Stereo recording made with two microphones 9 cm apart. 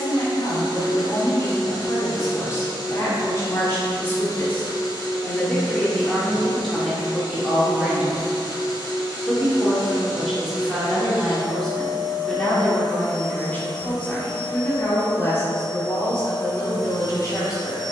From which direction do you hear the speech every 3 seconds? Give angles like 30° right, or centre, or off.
40° left, 20° left, centre, centre, 20° left, 30° left.